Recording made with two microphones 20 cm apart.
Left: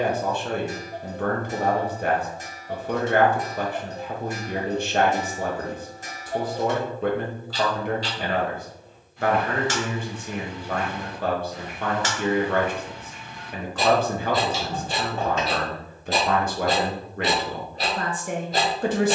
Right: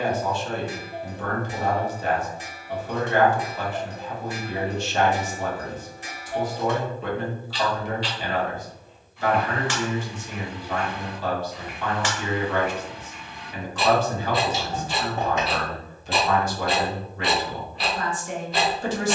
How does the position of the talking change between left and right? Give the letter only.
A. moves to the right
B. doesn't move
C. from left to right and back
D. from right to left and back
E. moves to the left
B.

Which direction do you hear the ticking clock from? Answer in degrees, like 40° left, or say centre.
40° left.